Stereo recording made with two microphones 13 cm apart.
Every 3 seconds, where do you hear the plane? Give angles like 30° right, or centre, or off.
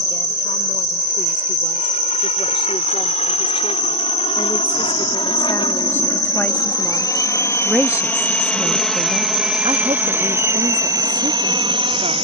60° left, 50° left, 20° left, 20° right.